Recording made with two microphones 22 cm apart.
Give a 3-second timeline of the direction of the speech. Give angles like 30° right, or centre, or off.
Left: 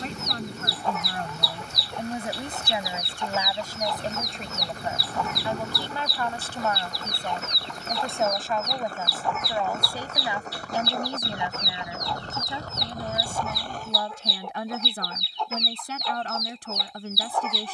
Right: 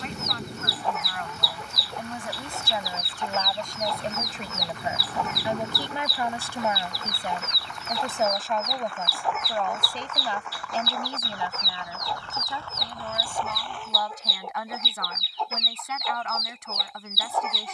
30° left, centre, 10° right, 10° left, 30° left, 30° left.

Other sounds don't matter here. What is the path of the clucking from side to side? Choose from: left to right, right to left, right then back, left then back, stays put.
stays put.